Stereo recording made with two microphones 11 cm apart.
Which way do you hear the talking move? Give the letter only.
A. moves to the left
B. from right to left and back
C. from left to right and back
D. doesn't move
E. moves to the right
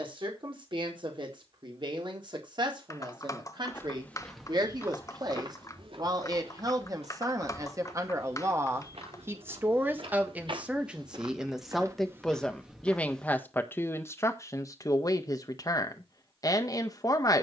A.